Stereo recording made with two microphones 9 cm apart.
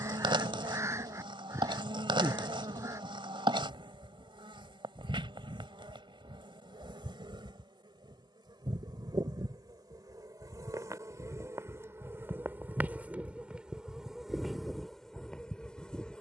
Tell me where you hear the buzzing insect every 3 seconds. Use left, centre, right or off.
right, right, right, right, centre, centre.